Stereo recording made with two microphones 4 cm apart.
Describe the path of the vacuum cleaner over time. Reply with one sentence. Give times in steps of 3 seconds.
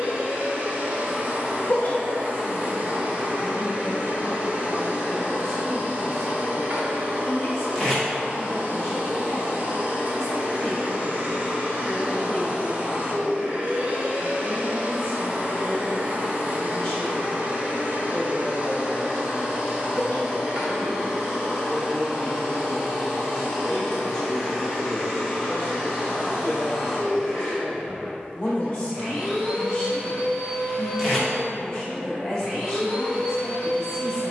You can hear the vacuum cleaner on the right from 0 s and in the centre from 21 s.